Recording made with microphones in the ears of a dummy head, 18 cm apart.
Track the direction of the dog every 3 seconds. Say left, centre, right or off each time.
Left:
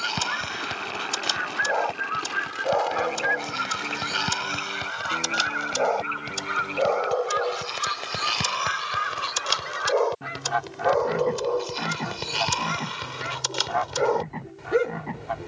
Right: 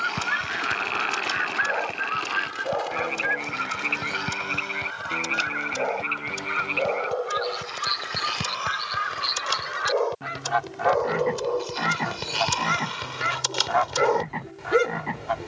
left, left, left, centre, centre.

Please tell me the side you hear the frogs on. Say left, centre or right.
right.